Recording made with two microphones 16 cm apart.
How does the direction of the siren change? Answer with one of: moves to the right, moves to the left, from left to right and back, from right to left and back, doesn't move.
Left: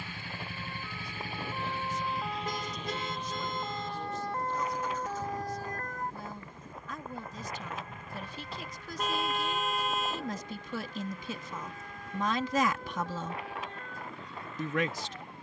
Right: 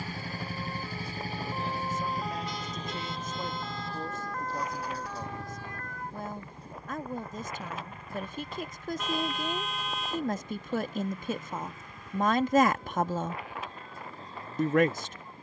moves to the left.